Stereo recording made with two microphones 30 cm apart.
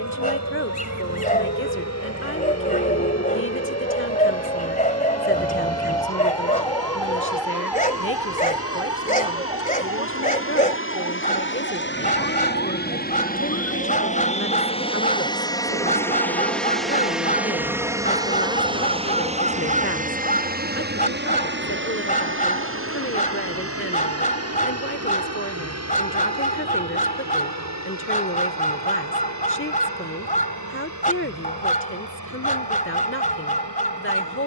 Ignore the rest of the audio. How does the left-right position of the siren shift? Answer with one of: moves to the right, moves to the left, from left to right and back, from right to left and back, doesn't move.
moves to the right.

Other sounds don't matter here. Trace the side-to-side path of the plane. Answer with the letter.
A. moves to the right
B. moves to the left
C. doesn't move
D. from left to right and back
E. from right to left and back
A.